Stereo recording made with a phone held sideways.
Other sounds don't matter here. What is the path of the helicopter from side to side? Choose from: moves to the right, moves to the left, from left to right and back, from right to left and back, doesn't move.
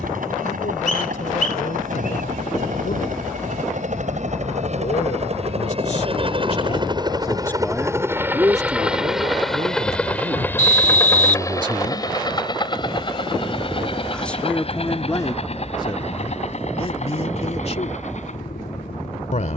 moves to the left.